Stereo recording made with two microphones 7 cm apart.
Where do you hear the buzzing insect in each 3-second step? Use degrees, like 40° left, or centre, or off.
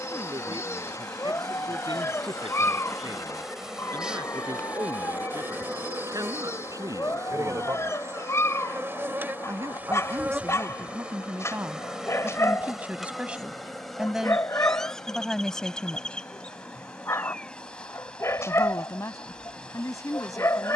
10° left, 20° right, 40° right, 20° right, centre, 10° left, 10° left.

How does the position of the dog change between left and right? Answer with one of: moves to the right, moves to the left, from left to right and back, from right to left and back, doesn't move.
doesn't move.